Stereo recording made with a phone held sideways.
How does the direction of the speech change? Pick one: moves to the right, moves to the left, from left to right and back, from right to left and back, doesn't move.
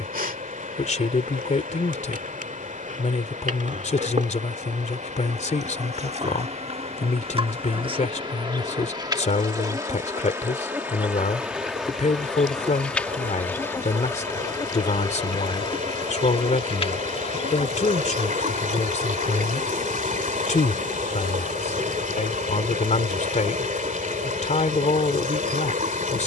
doesn't move.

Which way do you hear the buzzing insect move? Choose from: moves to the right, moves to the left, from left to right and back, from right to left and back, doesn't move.
moves to the left.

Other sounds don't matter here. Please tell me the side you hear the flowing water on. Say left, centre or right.
right.